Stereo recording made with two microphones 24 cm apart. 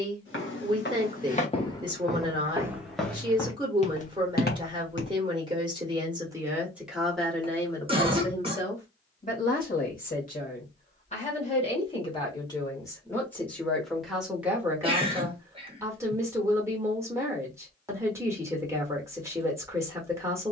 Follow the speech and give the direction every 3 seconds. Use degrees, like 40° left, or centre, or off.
20° right, 20° right, 10° left, 30° left, 10° left, 10° right, 10° right.